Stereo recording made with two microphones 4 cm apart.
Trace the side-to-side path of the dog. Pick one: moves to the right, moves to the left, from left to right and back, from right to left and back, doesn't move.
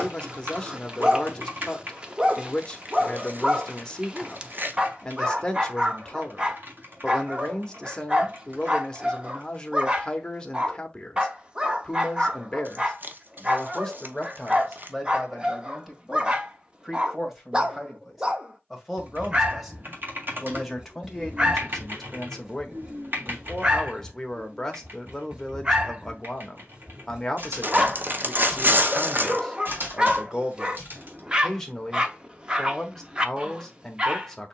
doesn't move.